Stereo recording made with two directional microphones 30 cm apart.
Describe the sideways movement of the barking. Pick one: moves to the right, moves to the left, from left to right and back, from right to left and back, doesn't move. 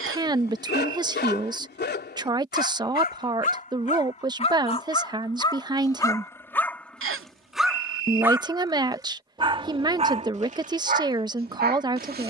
moves to the right.